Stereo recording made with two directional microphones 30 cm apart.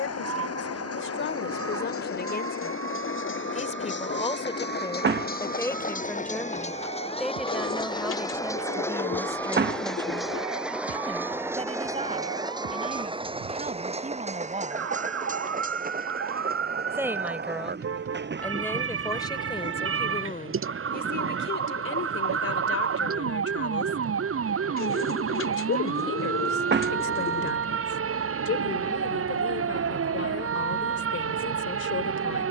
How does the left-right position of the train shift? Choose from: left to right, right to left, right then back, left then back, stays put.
left to right.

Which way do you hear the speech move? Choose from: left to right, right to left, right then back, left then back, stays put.
right then back.